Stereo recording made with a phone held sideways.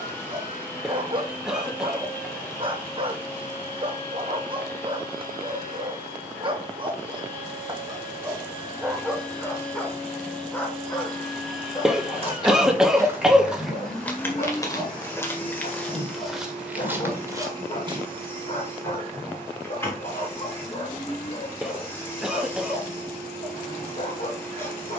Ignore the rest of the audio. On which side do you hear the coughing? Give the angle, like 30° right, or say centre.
centre.